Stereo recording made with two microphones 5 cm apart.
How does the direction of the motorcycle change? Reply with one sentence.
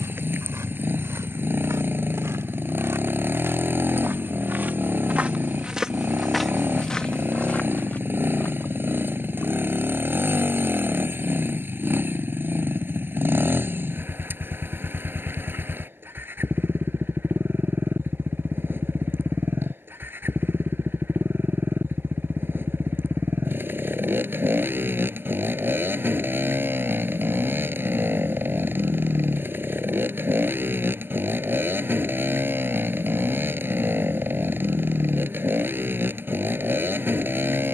You can hear the motorcycle stay put.